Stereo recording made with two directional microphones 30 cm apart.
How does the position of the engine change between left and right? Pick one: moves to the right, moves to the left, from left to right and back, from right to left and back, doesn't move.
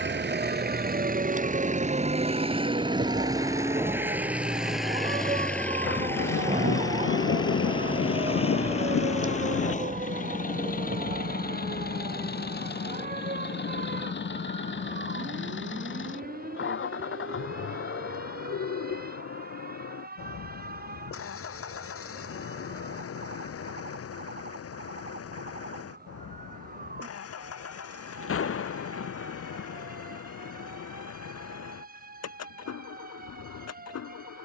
moves to the left.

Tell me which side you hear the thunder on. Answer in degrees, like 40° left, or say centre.
50° left.